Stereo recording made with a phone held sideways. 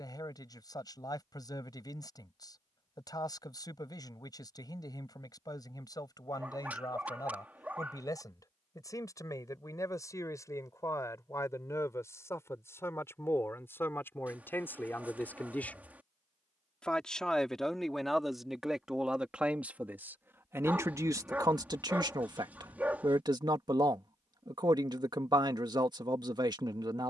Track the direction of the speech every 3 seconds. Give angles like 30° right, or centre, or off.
30° left, 30° left, 30° left, 20° left, 20° left, 10° left, 10° right, 30° right, 30° right.